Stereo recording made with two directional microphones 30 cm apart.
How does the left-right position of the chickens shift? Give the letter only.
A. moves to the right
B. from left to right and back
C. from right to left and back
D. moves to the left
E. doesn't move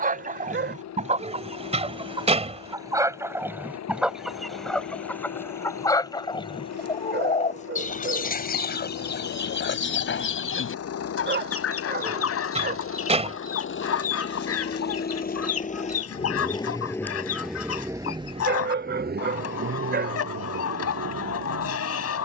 D.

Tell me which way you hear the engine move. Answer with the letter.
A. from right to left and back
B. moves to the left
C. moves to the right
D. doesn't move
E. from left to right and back
C.